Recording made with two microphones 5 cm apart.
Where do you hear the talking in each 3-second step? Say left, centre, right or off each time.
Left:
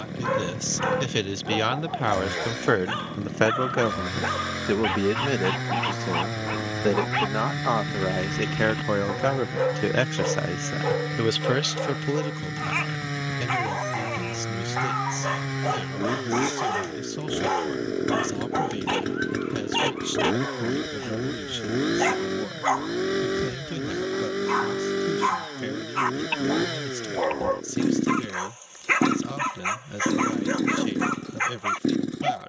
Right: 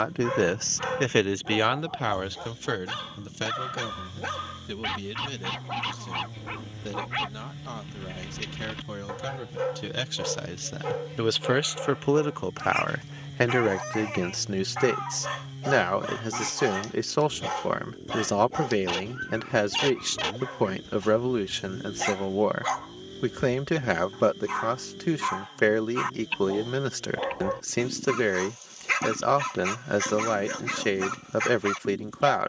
centre, left, left, left, right, right, right, right, right, right, right.